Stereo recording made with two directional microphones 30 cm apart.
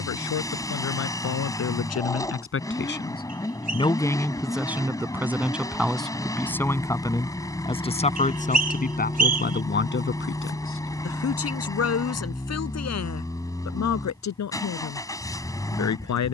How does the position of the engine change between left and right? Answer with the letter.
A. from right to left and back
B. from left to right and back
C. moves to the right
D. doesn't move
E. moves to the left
D.